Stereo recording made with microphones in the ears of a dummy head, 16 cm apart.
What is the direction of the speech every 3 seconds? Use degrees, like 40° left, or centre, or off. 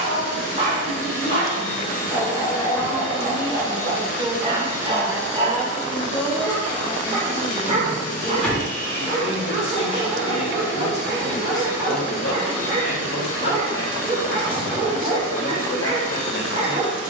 40° left, 10° right, 10° left, 50° left, 70° left, 70° left.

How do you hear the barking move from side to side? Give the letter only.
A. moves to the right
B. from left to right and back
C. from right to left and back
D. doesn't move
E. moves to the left
D.